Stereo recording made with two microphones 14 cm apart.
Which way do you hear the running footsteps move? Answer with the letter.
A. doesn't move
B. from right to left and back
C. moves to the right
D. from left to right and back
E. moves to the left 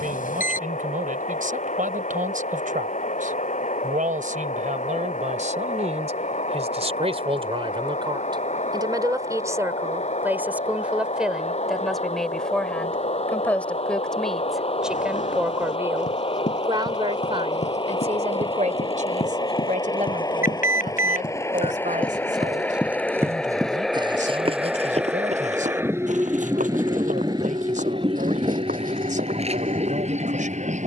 C.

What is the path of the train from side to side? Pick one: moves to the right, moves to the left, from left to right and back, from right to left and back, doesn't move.
moves to the right.